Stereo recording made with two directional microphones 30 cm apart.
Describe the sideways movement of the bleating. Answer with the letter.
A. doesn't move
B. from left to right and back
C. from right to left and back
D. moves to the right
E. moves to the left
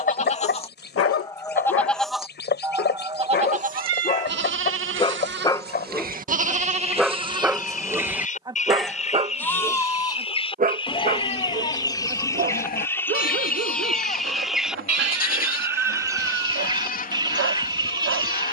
B.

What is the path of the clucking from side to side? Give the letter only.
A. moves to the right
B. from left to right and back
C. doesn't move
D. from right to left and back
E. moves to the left
A.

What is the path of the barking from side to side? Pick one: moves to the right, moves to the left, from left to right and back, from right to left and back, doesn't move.
moves to the right.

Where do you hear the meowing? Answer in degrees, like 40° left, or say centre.
60° right.